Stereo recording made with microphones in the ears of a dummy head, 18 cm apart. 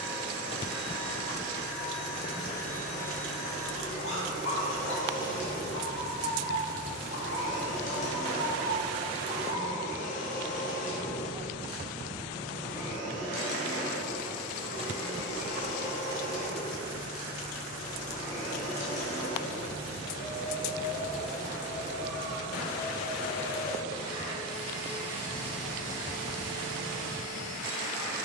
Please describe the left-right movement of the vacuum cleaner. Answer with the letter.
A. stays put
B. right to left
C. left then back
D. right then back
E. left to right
A.